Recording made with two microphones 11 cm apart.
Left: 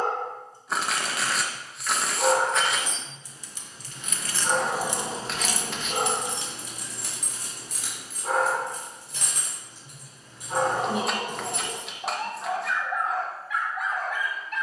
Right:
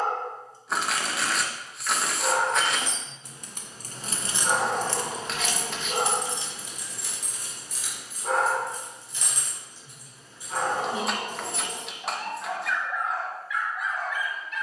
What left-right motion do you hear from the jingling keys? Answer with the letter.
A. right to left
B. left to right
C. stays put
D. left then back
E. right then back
A.